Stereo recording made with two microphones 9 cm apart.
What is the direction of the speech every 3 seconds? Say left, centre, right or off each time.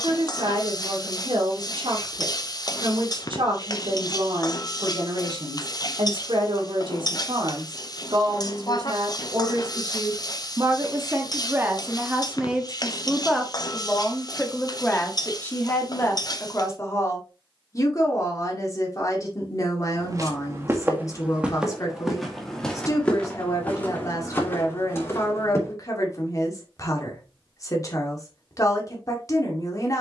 right, right, right, right, centre, left, left, left, left, left.